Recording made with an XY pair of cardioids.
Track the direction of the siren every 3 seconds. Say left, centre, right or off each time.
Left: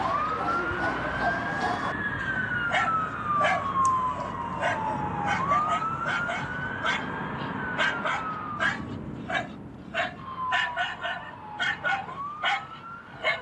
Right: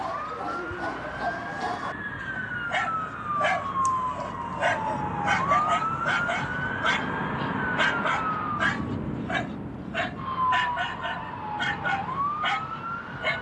left, centre, right, right, right.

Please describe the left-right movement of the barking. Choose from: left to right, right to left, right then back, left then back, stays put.
right then back.